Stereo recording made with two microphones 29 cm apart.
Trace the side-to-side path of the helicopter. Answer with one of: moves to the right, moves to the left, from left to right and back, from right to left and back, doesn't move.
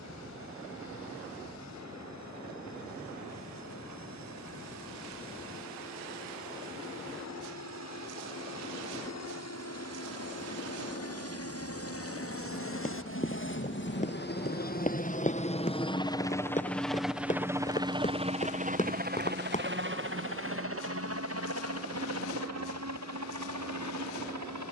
moves to the right.